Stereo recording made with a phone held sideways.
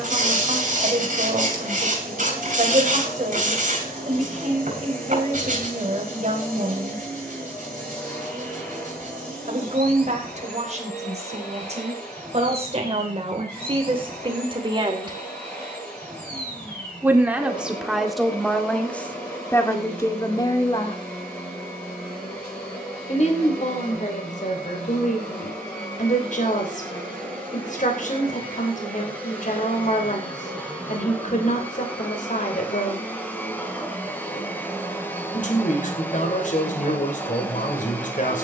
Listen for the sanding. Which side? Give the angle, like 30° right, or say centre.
60° right.